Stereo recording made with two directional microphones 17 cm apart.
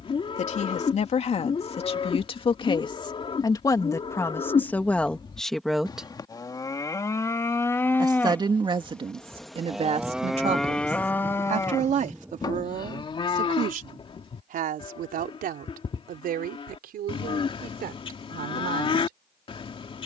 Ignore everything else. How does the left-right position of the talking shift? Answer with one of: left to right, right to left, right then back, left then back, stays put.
left to right.